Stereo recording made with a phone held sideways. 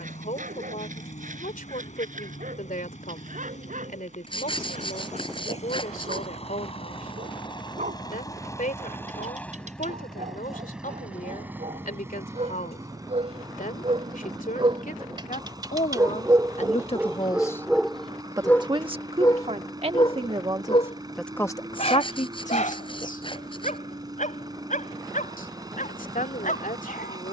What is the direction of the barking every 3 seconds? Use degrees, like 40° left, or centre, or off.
70° right, 70° right, 70° right, 60° right, 50° right, 20° right, 30° left, 60° left, 70° left.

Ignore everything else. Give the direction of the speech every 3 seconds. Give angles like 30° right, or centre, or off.
80° left, 80° left, 80° left, 80° left, 80° left, 50° left, 40° right, 50° left, 80° left.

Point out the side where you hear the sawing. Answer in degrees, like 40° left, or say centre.
40° left.